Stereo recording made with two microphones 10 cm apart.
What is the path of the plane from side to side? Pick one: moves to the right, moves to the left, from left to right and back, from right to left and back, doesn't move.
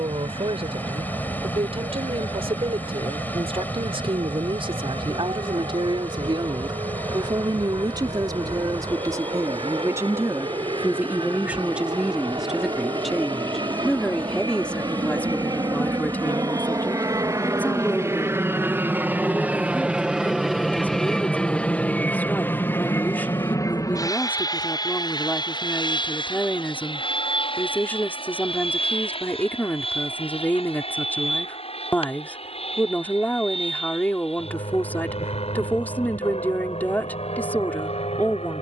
moves to the left.